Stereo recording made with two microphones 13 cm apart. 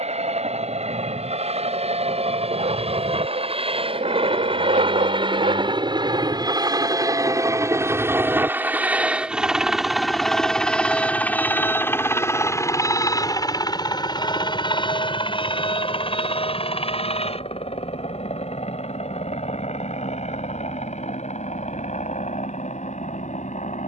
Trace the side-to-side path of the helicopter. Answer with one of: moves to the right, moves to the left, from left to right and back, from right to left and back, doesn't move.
moves to the left.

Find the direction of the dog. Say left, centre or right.
right.